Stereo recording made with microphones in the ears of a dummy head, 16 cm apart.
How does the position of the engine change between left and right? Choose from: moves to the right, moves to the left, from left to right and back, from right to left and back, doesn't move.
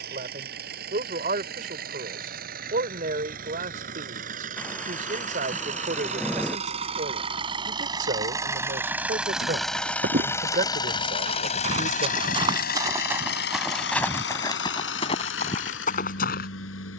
moves to the left.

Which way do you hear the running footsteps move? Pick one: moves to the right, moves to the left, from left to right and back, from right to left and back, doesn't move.
moves to the left.